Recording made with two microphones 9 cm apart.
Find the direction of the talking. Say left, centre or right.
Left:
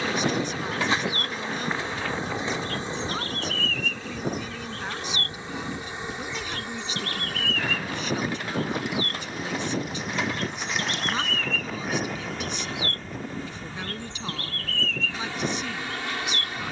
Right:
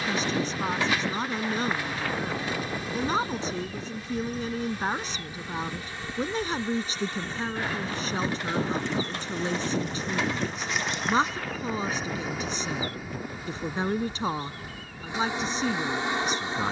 right.